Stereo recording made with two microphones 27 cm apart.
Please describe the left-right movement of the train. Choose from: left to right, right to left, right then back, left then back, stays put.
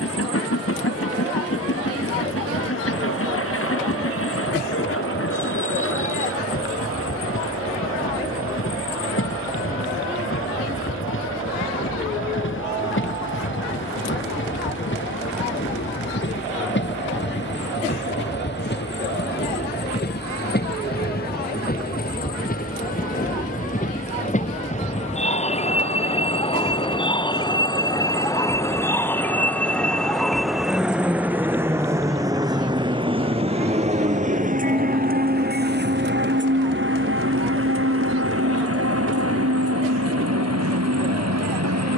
left to right.